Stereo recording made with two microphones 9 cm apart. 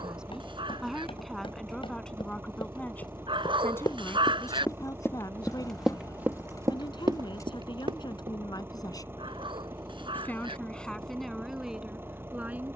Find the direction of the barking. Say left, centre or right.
right.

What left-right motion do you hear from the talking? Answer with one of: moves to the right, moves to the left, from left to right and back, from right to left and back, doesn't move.
from right to left and back.